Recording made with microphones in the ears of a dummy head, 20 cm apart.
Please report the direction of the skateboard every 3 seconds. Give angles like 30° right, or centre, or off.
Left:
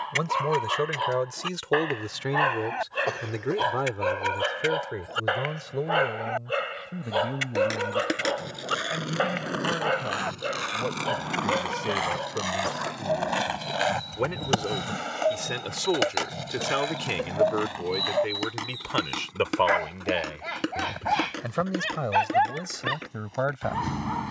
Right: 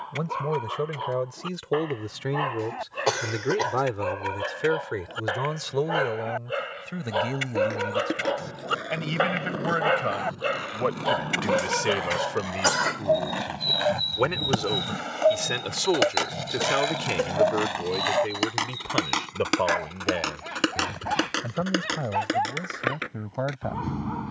off, off, 80° left, 70° left, 40° left, 10° right, 40° right, 60° right.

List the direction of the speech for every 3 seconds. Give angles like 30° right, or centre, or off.
30° left, 20° right, 50° right, 50° right, 30° right, 10° left, 40° left, 60° left.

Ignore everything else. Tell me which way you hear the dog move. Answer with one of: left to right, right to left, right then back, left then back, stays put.
right then back.